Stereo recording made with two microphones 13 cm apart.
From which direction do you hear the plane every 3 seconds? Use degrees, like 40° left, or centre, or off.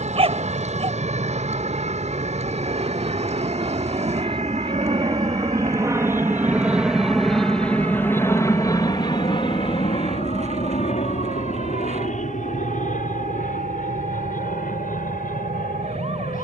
60° right, 40° right, 10° left, 50° left, 70° left, 70° left.